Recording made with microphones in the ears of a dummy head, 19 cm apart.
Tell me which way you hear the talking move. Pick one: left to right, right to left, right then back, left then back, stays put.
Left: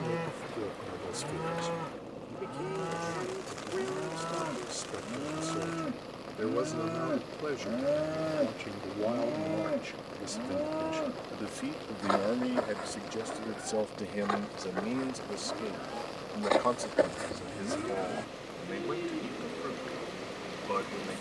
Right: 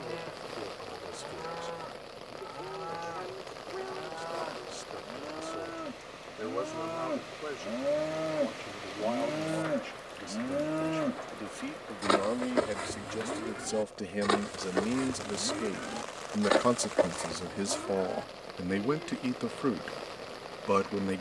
left to right.